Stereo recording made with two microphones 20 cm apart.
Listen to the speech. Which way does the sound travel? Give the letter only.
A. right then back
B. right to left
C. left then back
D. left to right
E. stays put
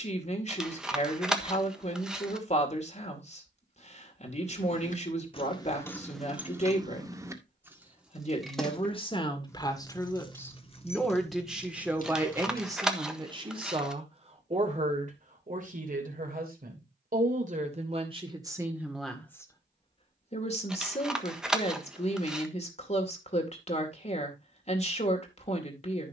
A.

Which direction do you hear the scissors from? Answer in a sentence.
In this clip you hear the scissors in the centre.